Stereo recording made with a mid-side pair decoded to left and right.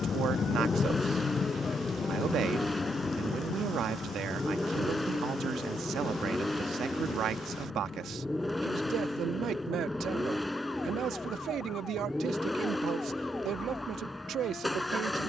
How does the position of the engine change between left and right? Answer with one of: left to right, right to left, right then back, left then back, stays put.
stays put.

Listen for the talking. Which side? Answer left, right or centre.
right.